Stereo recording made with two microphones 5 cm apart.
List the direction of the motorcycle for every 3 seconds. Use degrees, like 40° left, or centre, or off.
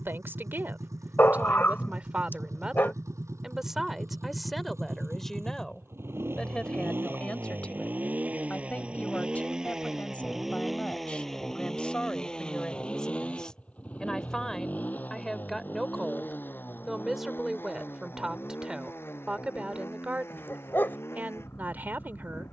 80° right, 60° right, 40° right, centre, 20° left, 40° left, 50° left, 50° left.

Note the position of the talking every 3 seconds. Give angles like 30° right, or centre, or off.
30° right, centre, 20° left, 20° left, 10° left, centre, 20° right, 40° right.